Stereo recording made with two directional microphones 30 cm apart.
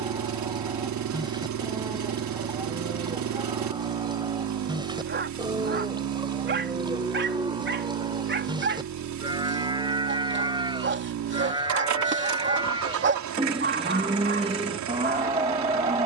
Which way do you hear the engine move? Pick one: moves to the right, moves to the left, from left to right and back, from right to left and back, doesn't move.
doesn't move.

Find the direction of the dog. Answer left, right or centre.
right.